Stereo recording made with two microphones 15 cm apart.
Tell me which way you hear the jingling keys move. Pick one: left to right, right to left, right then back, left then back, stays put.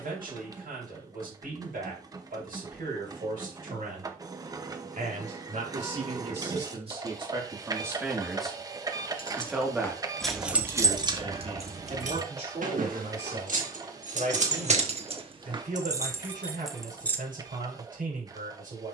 right then back.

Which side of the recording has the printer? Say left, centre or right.
right.